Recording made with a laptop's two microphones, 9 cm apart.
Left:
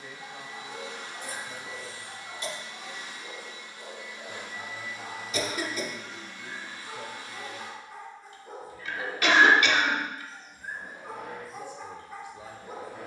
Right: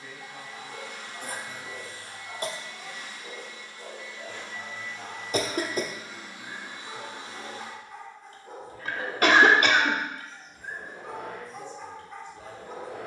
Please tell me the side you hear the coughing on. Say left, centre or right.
right.